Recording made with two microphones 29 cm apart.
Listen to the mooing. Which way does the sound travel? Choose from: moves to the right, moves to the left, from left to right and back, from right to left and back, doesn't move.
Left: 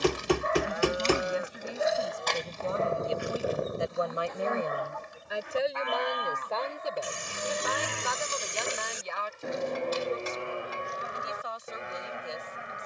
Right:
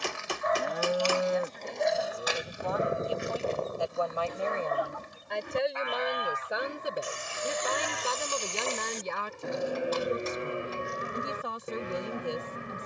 from right to left and back.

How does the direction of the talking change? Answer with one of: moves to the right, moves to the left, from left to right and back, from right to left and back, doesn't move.
moves to the right.